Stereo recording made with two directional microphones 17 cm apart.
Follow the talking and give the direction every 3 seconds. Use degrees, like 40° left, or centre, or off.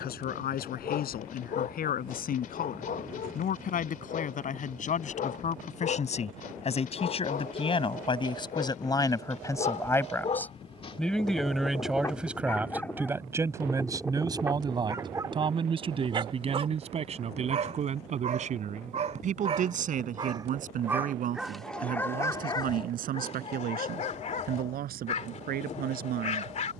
60° left, 50° left, 30° left, 10° left, 20° right, 40° right, 50° right, 60° right, 60° right.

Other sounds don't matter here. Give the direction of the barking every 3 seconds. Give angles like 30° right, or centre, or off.
50° left, 50° left, 50° left, 40° left, centre, 30° right, 30° right, 20° left, 40° left.